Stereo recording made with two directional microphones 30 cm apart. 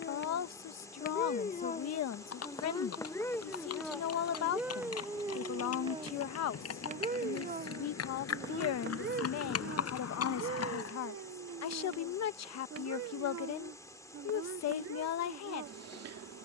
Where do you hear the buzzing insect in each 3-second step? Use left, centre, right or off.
left, centre, right, right, right, right.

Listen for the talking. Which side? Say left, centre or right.
left.